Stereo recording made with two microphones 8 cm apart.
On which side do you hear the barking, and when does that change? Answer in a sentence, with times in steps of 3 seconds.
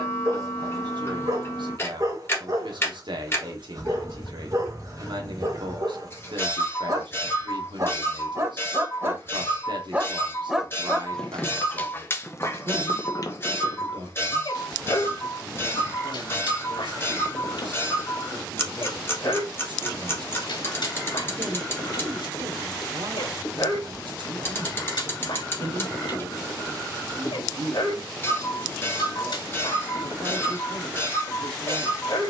In this clip you hear the barking on the right from 0 s, in the centre from 9 s and on the left from 12 s.